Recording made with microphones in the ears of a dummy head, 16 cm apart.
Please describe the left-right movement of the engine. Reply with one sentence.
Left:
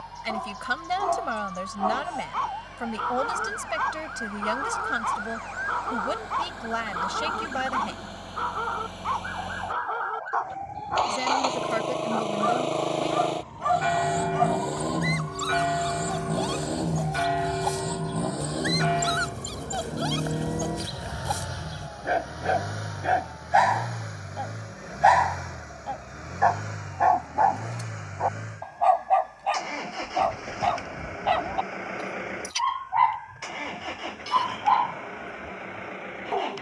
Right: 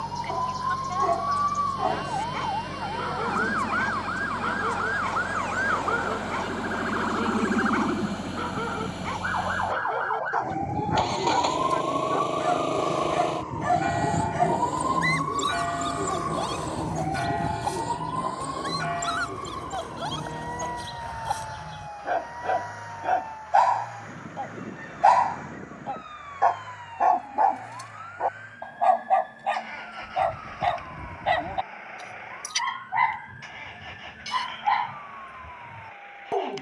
In this clip you hear the engine travel towards the left.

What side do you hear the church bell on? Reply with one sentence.
You can hear the church bell on the left.